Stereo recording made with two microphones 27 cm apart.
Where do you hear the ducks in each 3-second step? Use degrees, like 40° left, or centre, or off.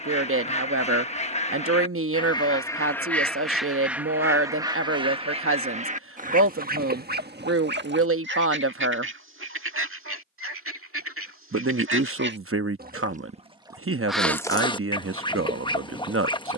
20° left, 10° right, 40° right, 50° right, 10° right, 20° left.